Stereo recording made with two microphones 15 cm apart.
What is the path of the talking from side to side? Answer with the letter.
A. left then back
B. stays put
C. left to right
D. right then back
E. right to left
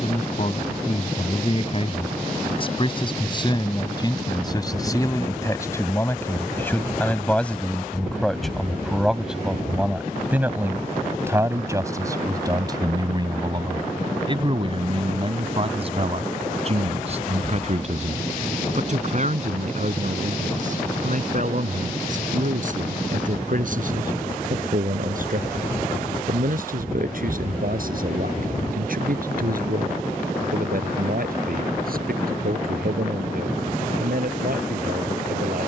C.